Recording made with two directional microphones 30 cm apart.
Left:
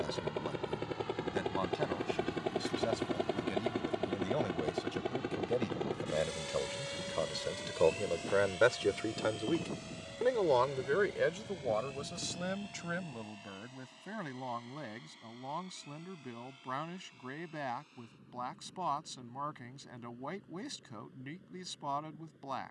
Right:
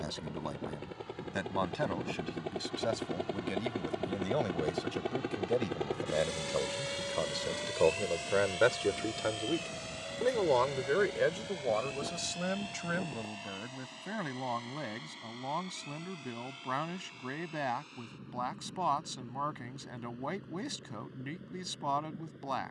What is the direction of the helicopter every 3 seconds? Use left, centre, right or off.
left, centre, right, right, right, right, right, right.